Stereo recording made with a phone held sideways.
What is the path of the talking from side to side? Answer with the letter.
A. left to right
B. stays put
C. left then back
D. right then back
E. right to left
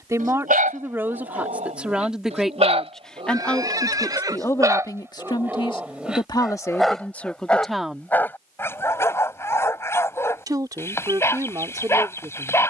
C.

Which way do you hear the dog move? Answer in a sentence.
You can hear the dog move from right to left.